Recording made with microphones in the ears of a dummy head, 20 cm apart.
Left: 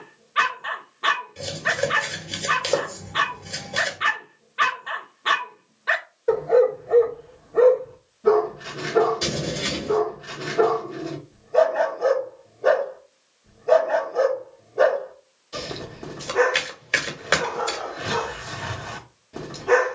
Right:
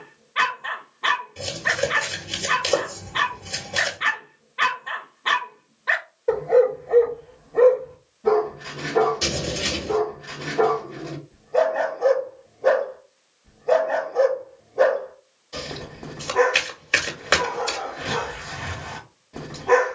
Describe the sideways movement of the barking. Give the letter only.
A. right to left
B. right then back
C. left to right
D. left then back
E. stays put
E.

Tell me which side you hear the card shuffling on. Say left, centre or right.
centre.